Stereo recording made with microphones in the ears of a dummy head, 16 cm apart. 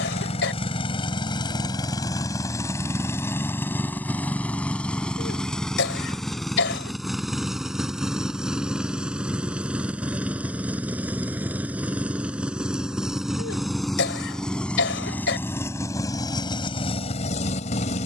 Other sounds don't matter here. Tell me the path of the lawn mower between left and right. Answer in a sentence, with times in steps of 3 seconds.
In this clip you hear the lawn mower on the left from 0 s, in the centre from 3 s and on the left from 15 s.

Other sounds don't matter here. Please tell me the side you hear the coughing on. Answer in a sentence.
You can hear the coughing on the left.